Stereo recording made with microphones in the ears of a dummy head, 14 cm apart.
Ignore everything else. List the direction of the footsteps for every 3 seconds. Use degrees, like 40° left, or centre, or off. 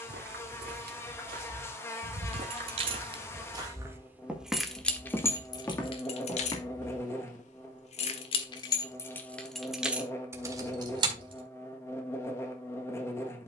60° right, 10° right, 30° left, off, off.